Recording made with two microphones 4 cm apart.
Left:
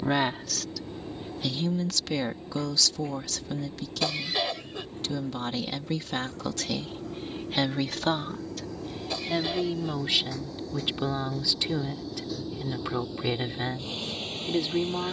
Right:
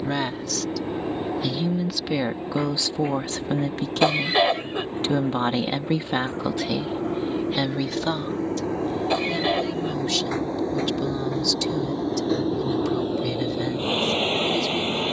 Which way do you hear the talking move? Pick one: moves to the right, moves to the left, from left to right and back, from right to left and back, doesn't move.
from left to right and back.